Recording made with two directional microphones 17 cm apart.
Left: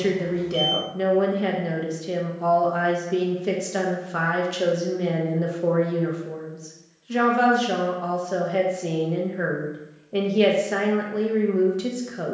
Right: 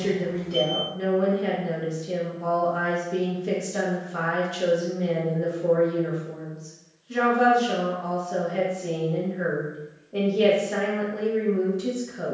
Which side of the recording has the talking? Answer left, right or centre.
left.